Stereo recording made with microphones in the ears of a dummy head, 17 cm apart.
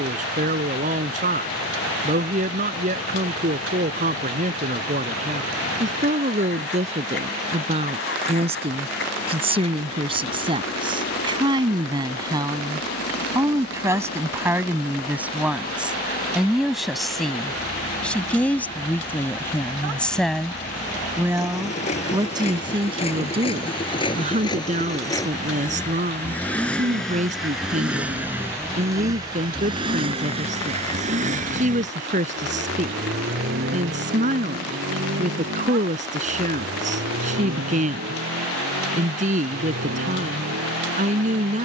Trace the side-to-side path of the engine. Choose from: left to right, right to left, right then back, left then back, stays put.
left to right.